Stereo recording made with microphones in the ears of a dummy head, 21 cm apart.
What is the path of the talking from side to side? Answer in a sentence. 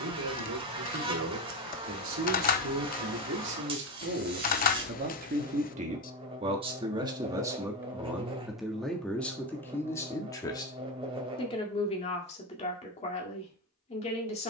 You can hear the talking move to the left.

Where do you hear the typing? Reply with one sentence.
In this clip you hear the typing on the left.